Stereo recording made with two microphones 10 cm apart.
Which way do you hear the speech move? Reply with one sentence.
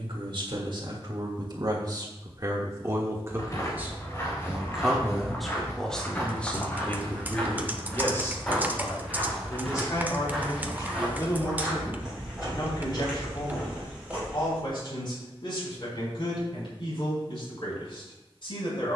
In this clip you hear the speech move from right to left.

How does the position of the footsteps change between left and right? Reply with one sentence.
You can hear the footsteps go from the left side to the right.